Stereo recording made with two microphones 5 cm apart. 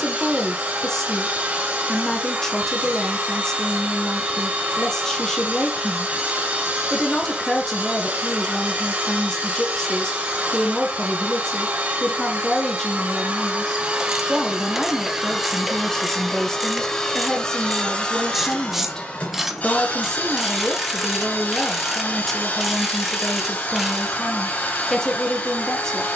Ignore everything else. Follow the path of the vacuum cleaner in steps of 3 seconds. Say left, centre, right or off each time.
right, right, right, right, right, centre, left, left, left.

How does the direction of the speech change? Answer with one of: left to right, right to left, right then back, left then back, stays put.
stays put.